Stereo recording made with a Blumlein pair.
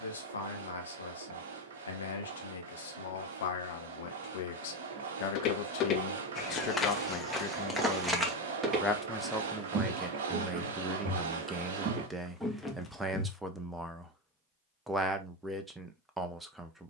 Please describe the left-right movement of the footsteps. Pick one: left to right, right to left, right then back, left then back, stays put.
right then back.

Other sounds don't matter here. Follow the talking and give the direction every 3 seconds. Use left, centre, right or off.
left, left, left, centre, centre, centre.